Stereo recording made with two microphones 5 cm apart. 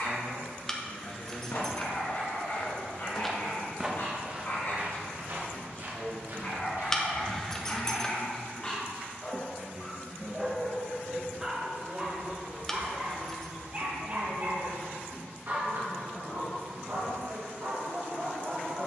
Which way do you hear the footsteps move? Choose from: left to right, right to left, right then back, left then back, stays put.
left to right.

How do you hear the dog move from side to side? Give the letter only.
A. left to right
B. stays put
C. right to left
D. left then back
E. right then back
A.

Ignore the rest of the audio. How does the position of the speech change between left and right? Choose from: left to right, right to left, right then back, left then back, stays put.
left to right.